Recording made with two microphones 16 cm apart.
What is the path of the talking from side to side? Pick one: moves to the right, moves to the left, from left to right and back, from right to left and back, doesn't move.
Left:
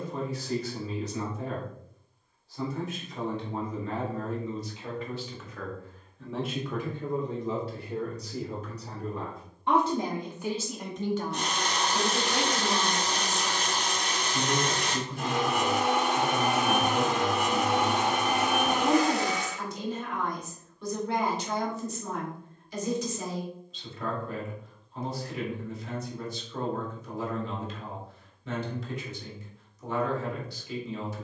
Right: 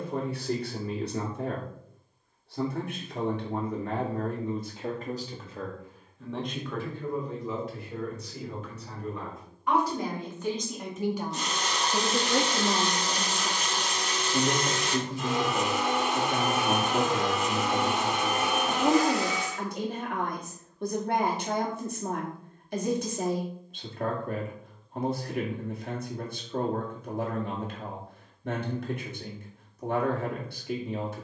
from right to left and back.